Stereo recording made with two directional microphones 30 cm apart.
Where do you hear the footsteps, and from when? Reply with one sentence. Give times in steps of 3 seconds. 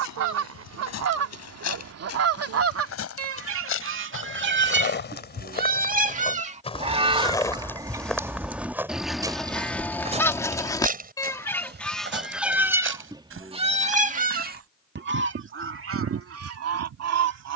In this clip you hear the footsteps on the left from 0 s, in the centre from 6 s, on the right from 9 s and not at all from 15 s.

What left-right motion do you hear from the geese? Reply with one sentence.
You can hear the geese go left and come back.